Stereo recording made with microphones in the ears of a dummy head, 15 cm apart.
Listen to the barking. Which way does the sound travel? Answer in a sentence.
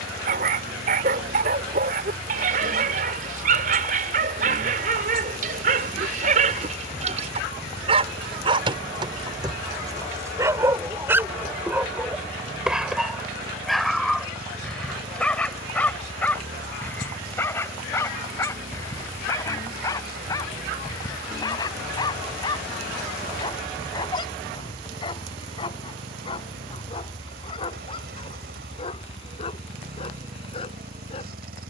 In this clip you hear the barking go from the right side to the left.